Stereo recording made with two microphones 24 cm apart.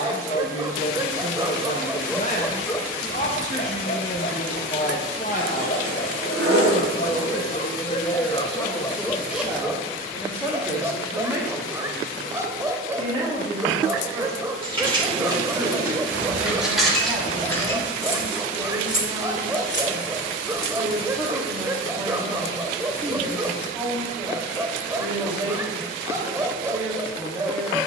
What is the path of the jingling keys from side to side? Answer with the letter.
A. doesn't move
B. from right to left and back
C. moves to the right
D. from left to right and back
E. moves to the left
E.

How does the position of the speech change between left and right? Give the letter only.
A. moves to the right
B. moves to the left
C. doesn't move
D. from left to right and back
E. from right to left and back
A.